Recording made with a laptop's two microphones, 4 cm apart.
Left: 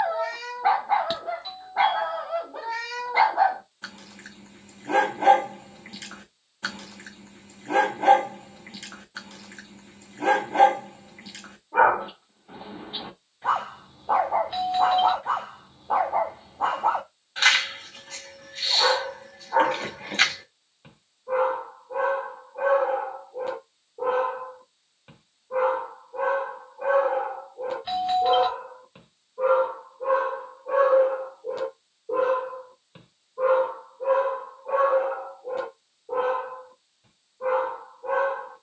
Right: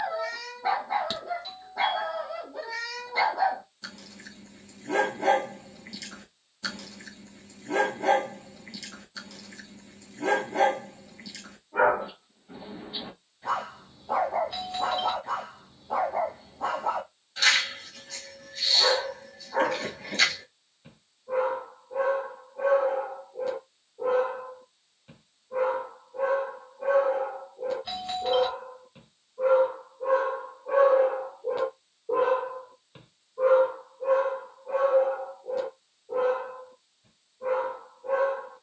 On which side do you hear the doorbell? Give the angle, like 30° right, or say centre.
20° left.